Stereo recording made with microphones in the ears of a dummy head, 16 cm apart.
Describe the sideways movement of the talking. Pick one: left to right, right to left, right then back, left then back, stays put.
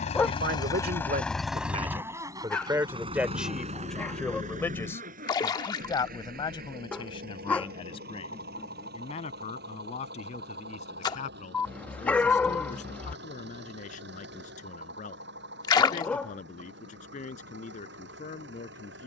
right to left.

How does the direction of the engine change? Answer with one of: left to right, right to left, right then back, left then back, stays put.
left to right.